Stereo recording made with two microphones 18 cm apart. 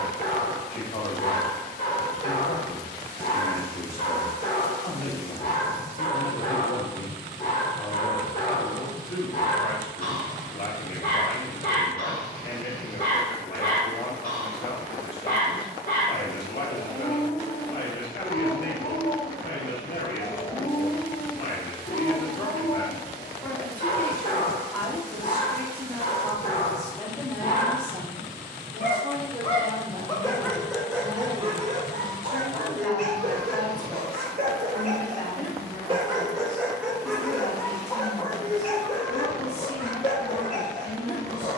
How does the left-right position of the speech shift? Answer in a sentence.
In this clip you hear the speech move from left to right and back again.